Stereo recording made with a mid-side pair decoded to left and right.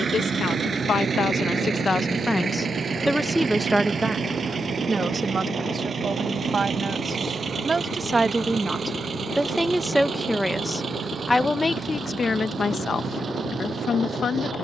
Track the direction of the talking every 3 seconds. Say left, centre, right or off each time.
left, right, right, centre, left.